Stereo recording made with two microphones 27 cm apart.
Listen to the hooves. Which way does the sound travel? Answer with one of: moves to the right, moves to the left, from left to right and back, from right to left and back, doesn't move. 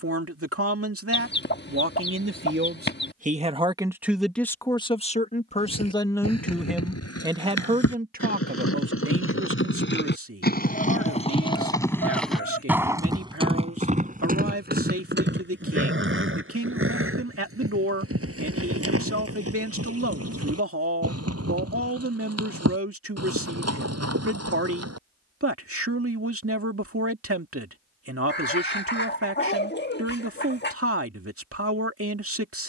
moves to the right.